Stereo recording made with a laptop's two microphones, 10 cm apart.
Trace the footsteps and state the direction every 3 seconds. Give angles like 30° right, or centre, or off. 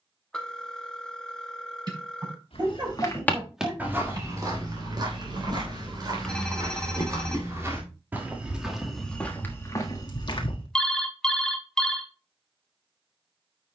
50° left, 30° right, 20° right, 30° left, off.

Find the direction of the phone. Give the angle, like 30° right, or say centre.
10° left.